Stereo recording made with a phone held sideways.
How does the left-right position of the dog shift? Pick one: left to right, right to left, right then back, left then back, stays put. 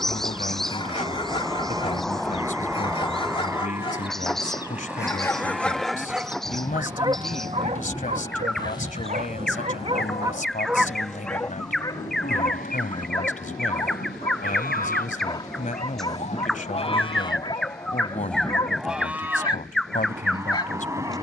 right then back.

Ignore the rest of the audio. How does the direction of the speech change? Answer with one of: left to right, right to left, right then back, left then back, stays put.
stays put.